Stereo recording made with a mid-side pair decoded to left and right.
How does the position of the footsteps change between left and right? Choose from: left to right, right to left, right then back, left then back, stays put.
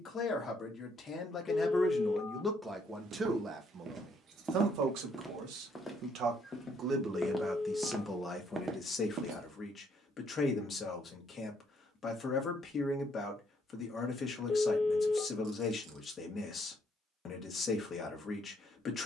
left then back.